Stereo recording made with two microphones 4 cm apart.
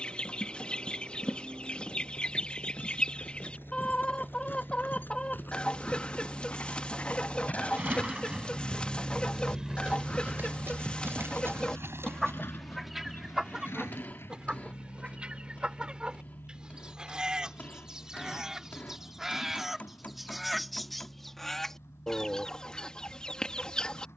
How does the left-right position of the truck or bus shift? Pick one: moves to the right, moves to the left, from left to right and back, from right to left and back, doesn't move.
moves to the left.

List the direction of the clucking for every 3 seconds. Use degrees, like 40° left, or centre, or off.
30° left, 30° left, 30° left, 30° left, 10° right, 20° right, centre, 20° left.